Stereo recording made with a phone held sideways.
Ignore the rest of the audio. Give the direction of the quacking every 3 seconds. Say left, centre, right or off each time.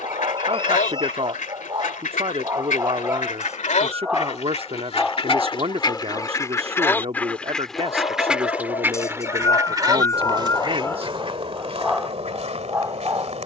left, left, centre, right, right.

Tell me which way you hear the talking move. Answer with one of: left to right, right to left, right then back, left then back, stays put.
stays put.